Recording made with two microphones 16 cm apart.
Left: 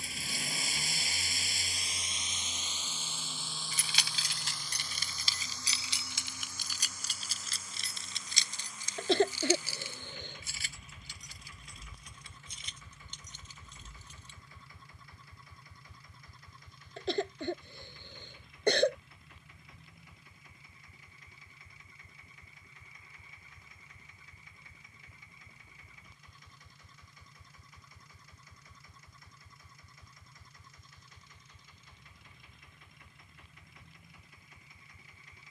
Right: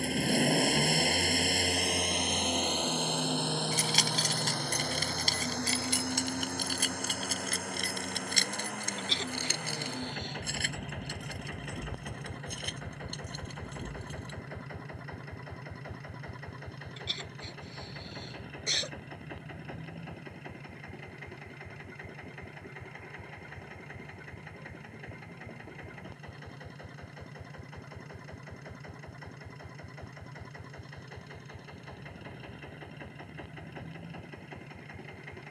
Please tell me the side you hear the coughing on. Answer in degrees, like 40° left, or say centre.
60° left.